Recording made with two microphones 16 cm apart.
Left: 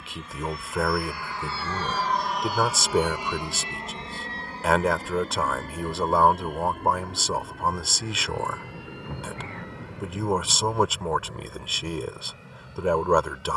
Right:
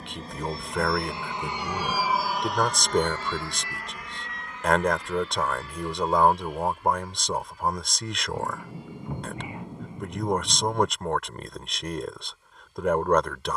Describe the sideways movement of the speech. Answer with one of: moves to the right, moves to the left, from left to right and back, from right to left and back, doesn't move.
doesn't move.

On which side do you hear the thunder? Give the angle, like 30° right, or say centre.
10° right.